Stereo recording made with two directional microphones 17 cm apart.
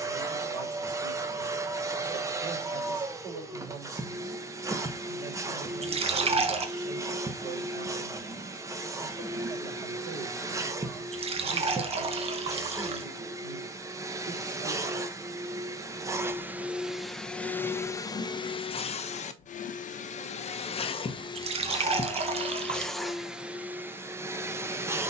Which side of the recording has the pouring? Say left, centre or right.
right.